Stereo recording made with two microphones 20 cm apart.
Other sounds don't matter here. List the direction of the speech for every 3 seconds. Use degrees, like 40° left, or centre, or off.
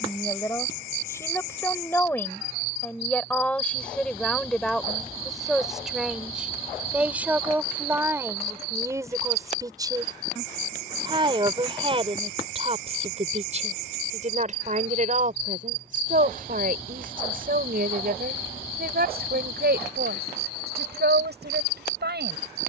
10° left, centre, 10° right, 20° right, 40° right, 50° right, 60° right, 70° right.